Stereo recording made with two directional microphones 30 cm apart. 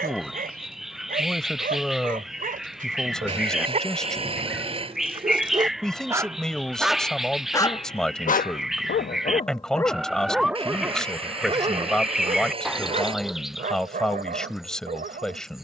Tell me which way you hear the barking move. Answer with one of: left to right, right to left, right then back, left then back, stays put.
left then back.